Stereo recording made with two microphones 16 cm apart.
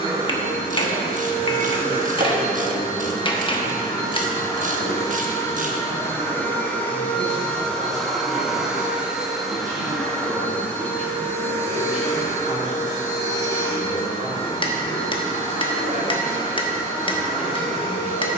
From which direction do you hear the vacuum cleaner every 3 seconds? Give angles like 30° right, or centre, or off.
30° left, 20° left, 10° left, 10° left, 30° left, 30° left.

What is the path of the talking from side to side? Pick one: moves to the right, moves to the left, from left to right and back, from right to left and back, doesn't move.
doesn't move.